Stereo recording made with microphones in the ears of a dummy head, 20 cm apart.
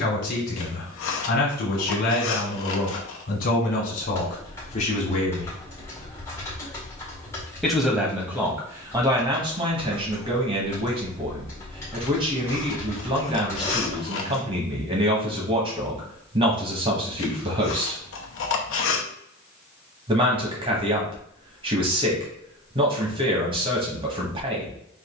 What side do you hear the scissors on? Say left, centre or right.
left.